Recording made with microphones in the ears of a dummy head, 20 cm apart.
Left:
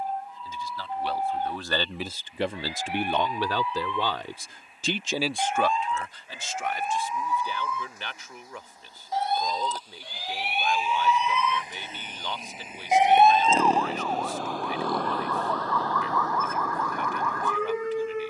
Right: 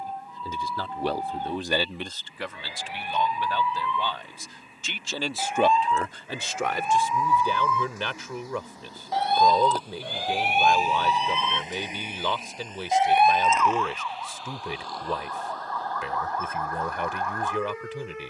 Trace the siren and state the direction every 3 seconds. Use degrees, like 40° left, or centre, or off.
80° right, 80° right, 70° right, 40° right, 30° left, 60° left.